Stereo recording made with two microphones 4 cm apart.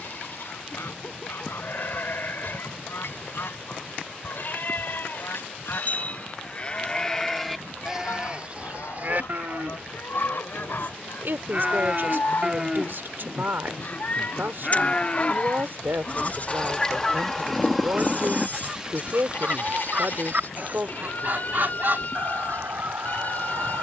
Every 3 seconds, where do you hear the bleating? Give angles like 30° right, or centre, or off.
60° left, 60° left, centre, 40° right, centre, 40° left, 50° left, 50° left.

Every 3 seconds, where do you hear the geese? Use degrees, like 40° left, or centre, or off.
70° left, 70° left, 70° left, 60° left, 50° left, 20° left, 30° right, 60° right.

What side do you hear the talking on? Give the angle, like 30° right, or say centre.
60° right.